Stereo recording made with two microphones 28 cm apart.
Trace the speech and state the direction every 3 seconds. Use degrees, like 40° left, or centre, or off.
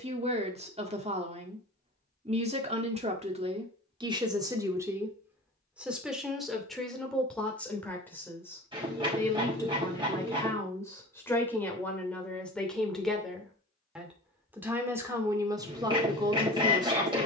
20° right, 10° right, centre, 10° left, centre, 10° right.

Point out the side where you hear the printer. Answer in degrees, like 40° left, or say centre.
20° right.